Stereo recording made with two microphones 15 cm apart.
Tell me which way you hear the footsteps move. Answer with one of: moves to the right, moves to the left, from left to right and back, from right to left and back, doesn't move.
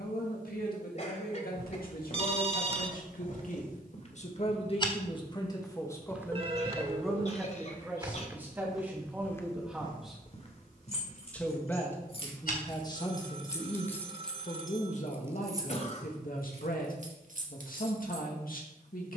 from left to right and back.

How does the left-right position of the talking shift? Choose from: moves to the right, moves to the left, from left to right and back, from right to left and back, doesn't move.
from left to right and back.